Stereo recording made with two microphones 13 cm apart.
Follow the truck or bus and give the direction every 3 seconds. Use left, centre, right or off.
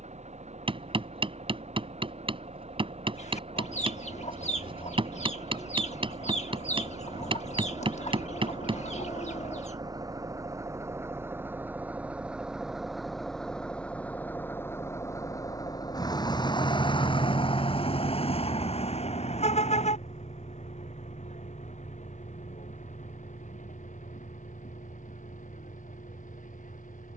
right, right, right, right, centre, left, left, left, left.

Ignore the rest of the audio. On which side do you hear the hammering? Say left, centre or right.
right.